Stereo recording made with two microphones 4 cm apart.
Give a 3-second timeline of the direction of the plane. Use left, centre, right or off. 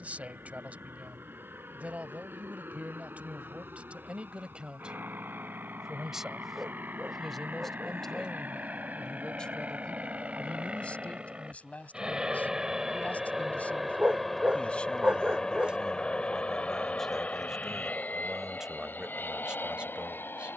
right, right, right, right, centre, left, left.